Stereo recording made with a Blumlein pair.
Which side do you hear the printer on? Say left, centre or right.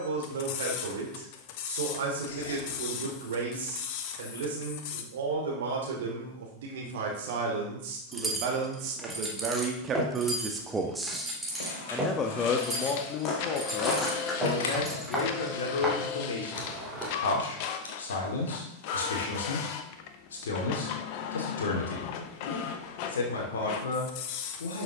left.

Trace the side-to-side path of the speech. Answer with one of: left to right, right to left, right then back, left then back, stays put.
right to left.